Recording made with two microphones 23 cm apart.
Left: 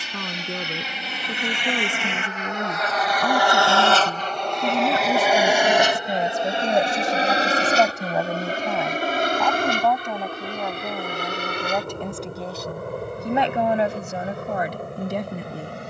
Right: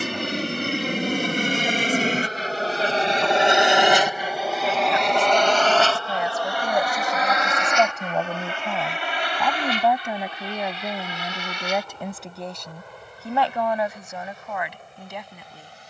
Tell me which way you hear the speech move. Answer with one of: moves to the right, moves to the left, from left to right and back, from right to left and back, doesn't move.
from left to right and back.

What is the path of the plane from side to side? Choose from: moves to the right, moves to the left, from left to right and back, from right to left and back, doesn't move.
moves to the left.